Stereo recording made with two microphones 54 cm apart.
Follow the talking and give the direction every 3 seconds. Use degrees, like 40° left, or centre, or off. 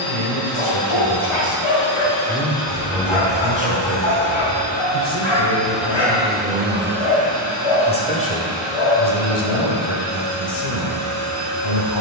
30° left, 20° right, 10° left, 40° left.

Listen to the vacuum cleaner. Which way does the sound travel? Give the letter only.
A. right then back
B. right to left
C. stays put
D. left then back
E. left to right
E.